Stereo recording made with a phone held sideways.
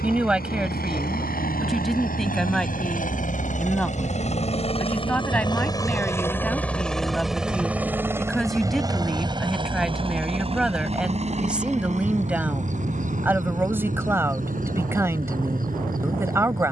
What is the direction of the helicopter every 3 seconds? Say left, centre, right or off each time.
left, left, centre, right, right, right.